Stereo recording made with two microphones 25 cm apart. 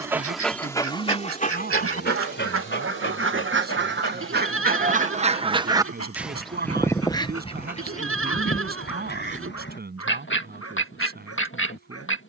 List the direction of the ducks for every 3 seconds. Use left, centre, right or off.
right, right, left, left.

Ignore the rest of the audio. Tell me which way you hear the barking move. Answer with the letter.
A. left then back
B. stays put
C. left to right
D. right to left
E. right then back
D.